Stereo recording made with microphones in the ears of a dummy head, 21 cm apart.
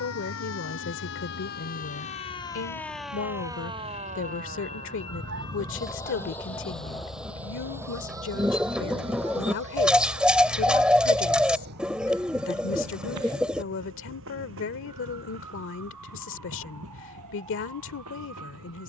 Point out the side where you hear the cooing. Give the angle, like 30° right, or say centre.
centre.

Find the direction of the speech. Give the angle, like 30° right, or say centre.
60° left.